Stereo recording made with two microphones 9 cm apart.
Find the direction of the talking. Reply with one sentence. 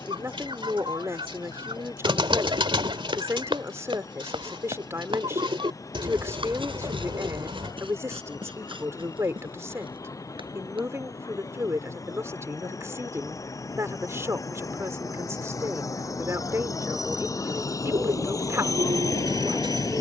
You can hear the talking on the right.